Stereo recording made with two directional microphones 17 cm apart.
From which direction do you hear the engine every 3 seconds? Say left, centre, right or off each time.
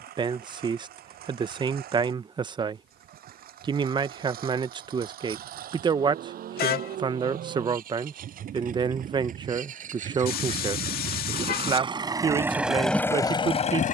right, right, right, right, centre.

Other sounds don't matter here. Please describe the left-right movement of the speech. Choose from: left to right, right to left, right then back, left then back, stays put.
stays put.